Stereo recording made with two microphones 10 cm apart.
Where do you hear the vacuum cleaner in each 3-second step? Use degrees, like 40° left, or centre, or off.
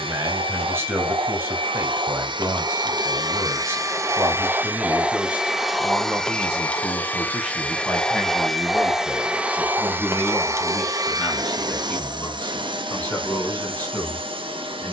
70° right, 20° right, 10° left, 30° right, 70° right.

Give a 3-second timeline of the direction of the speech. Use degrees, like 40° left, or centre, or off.
30° right, 20° right, centre, 10° left, 20° left.